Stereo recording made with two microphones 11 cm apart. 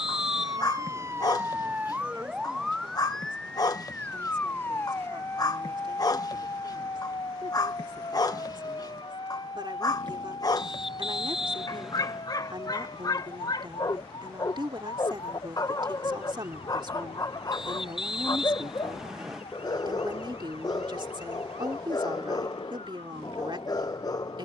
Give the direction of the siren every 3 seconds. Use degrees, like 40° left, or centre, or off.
20° right, 20° left, 30° left, 40° left, 50° left, 50° left, 60° left, 60° left.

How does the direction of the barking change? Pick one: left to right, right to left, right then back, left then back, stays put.
stays put.